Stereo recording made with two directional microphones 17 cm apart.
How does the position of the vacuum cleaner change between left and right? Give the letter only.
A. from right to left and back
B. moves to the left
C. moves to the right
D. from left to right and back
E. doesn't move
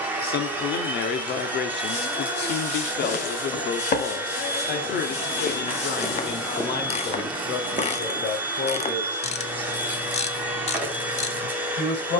E.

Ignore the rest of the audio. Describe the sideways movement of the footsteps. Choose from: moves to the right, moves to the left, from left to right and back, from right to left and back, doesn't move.
moves to the right.